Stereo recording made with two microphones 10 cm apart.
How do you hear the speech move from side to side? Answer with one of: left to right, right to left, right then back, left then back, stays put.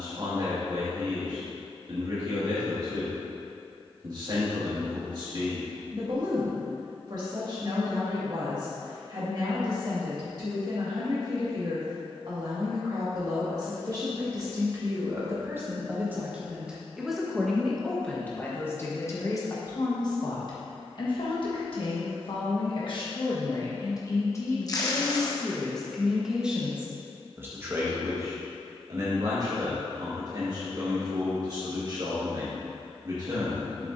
left then back.